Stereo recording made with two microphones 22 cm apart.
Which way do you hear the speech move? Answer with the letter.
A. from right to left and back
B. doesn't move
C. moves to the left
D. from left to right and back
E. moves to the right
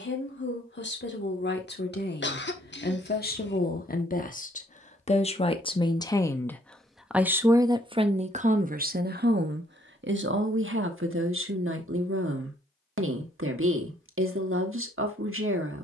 E.